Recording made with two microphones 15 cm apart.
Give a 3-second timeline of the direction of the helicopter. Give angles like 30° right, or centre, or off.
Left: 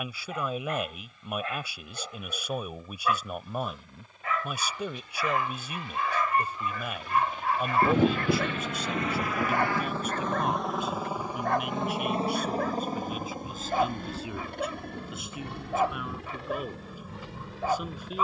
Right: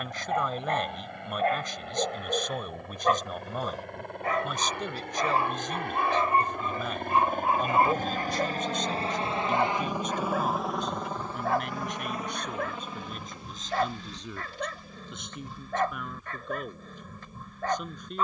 70° right, 70° right, 50° right, centre, 40° left, 60° left.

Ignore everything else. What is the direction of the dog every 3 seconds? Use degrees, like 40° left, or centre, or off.
50° right, 30° right, 20° right, 10° right, 10° left, 10° left.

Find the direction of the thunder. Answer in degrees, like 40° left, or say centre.
70° left.